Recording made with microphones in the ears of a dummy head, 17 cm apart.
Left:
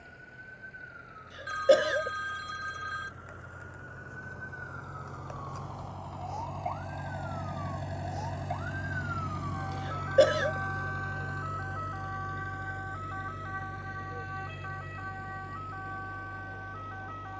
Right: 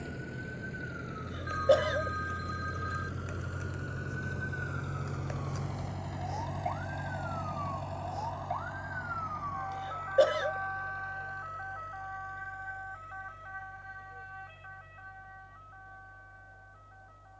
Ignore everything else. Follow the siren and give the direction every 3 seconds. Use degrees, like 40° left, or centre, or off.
40° right, 30° right, centre, 40° left, 60° left, 70° left.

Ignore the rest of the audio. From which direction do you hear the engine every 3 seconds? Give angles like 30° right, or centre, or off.
60° right, 40° right, 10° left, 50° left, 70° left, 80° left.